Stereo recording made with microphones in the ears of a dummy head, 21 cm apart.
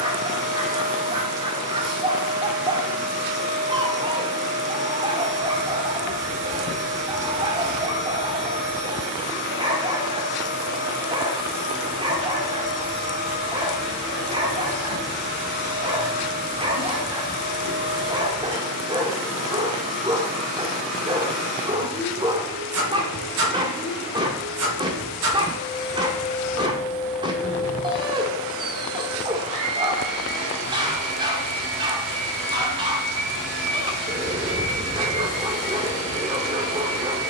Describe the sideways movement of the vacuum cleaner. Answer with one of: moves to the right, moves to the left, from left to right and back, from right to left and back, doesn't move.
doesn't move.